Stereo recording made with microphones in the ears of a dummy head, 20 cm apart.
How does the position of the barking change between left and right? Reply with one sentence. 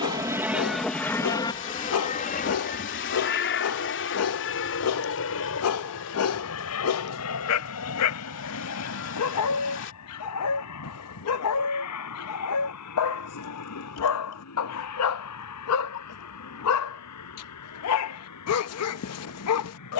You can hear the barking stay in one place.